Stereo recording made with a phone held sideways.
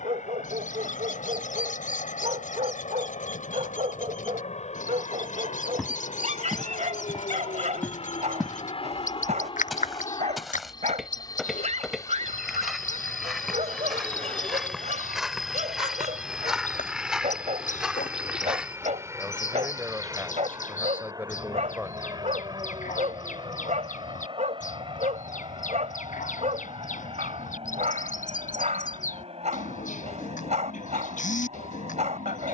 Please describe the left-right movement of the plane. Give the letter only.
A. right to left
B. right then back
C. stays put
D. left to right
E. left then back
D.